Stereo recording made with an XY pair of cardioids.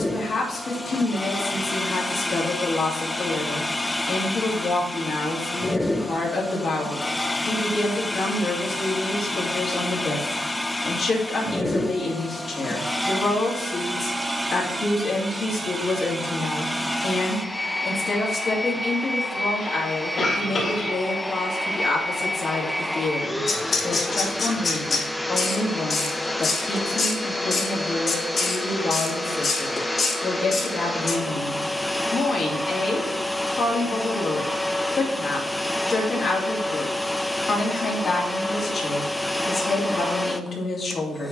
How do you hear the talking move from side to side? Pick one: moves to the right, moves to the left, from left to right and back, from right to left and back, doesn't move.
doesn't move.